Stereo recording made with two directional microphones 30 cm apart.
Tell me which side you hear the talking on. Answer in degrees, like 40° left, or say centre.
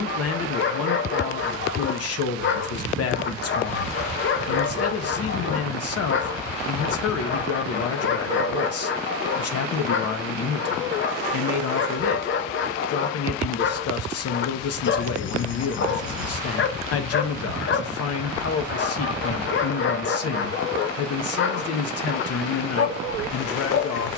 50° left.